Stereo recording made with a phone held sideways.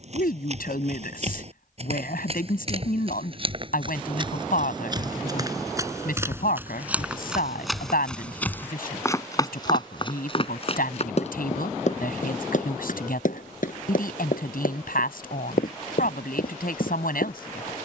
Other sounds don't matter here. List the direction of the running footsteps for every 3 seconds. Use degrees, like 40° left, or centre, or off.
50° right, 30° right, centre, 40° left, 70° left, 80° left.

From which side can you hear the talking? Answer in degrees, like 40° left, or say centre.
80° left.